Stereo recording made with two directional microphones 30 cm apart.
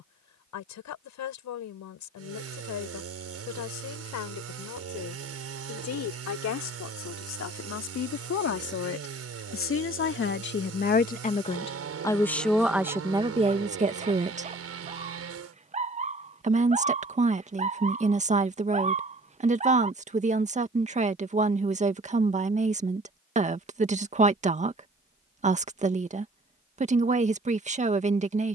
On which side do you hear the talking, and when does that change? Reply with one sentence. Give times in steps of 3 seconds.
In this clip you hear the talking on the left from 0 s, in the centre from 12 s and on the right from 15 s.